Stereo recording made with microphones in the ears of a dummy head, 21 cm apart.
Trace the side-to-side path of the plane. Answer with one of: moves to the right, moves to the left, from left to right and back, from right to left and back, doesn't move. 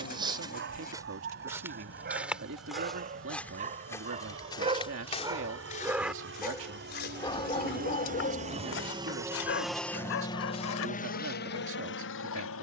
moves to the left.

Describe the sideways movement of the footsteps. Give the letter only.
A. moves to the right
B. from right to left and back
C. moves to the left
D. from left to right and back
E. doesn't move
C.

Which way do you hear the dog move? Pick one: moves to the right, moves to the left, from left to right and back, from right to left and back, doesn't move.
moves to the left.